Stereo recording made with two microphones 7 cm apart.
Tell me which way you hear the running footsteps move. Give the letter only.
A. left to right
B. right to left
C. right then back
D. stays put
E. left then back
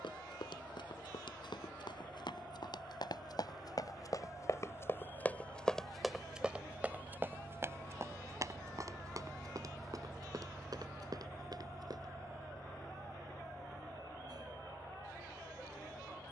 A.